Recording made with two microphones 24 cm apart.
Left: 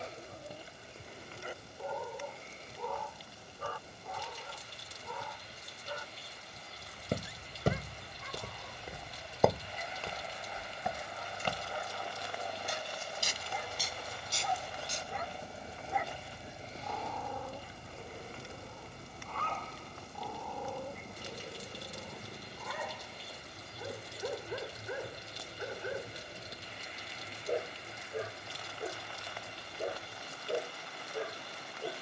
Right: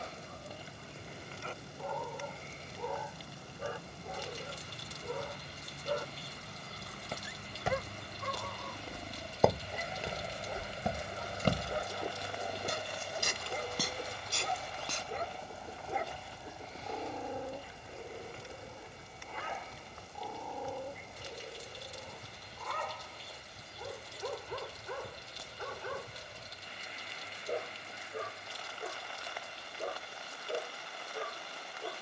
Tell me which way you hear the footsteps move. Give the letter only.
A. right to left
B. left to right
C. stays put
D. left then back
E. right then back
B.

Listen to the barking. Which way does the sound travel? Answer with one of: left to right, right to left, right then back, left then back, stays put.
right then back.